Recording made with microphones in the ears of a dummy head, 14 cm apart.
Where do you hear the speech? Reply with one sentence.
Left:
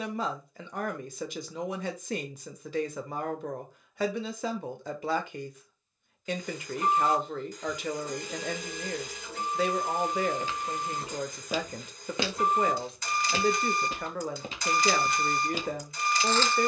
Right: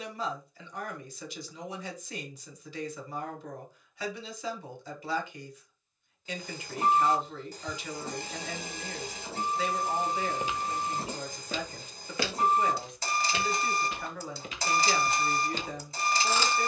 You can hear the speech on the left.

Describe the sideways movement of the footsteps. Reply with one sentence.
You can hear the footsteps go left and come back.